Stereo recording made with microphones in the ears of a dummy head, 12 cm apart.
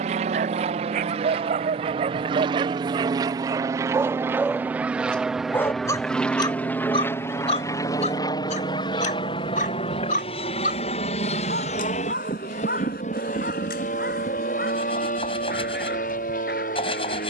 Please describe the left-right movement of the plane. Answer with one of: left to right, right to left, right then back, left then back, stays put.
right to left.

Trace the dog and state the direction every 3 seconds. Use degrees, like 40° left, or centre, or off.
50° right, 10° right, 50° left, 60° left, 70° left, 80° left.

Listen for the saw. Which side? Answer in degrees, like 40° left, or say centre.
40° left.